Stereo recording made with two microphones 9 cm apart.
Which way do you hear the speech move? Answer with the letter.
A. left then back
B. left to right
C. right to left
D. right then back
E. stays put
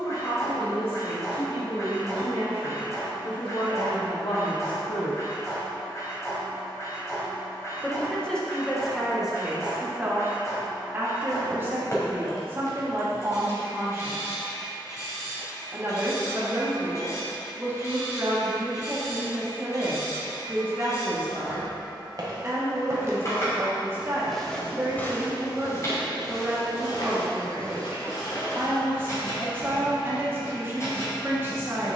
B.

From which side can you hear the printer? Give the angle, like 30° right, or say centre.
40° left.